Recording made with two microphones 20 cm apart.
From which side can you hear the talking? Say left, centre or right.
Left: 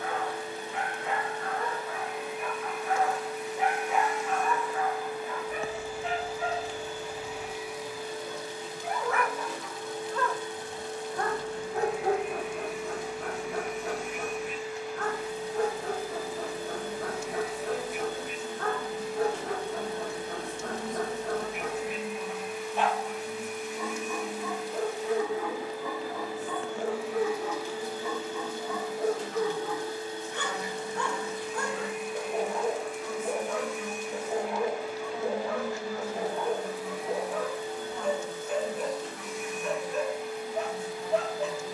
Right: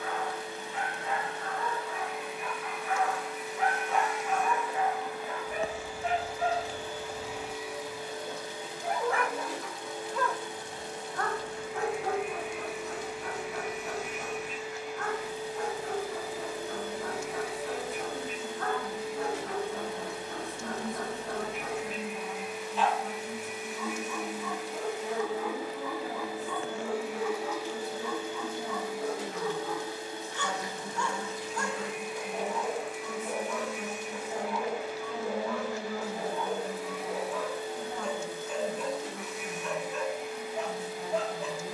right.